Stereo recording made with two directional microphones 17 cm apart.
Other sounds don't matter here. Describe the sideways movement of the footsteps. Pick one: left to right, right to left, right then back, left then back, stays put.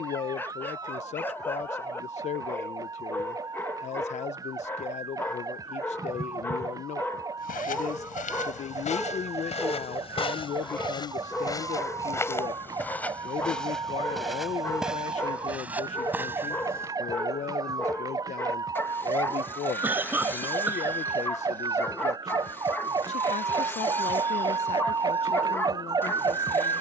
left to right.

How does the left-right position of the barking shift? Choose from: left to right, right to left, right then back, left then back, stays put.
stays put.